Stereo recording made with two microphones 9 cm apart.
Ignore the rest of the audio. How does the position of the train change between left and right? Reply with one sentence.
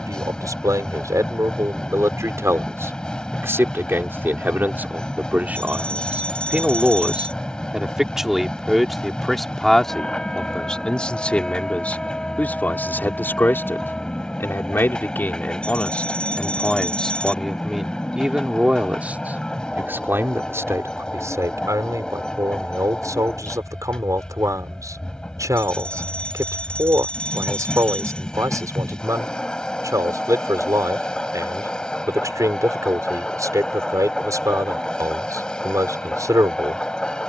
You can hear the train stay put.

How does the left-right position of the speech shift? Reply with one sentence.
You can hear the speech go left and come back.